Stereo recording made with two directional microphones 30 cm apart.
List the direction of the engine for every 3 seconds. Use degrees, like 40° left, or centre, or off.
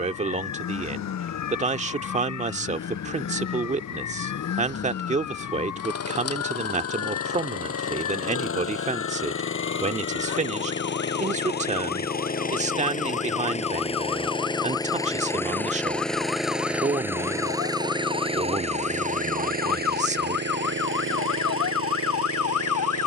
60° left, 50° left, 50° left, 40° left, 20° left, centre, 30° right, 40° right.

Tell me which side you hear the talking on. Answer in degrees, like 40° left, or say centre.
20° right.